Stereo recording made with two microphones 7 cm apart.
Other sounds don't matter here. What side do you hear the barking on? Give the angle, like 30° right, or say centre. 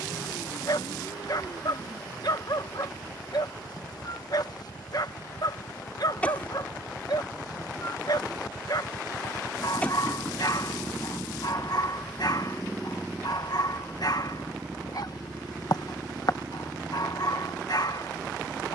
60° left.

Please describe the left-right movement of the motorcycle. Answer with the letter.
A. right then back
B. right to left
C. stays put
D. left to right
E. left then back
D.